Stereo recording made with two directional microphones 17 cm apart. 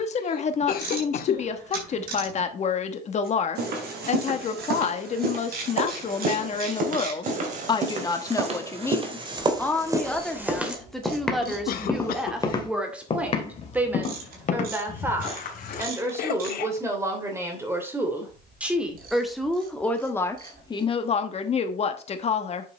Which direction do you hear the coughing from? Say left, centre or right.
left.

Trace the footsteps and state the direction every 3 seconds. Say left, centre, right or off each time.
off, right, right, centre, left, left, off, off.